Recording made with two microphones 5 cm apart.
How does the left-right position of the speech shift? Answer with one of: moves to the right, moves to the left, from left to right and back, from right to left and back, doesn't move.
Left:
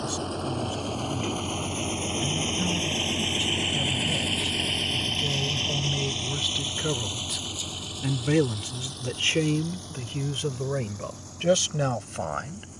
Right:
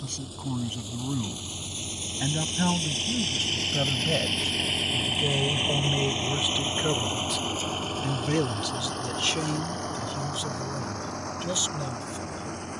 moves to the left.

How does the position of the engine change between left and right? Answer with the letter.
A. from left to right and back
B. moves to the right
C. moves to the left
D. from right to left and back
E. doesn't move
B.